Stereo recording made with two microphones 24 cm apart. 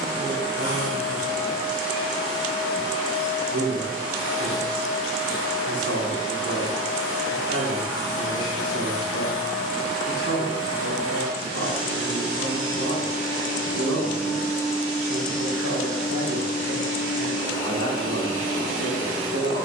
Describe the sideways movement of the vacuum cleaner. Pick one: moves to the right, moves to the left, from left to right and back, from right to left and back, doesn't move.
doesn't move.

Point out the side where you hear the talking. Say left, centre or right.
right.